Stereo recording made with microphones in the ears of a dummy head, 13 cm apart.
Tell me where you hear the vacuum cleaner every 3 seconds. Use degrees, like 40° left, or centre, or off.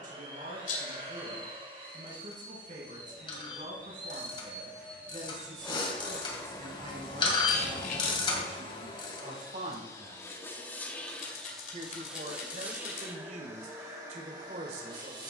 40° right, 20° right, 30° left, 20° left, 20° right.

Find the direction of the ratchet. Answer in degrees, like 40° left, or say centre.
30° left.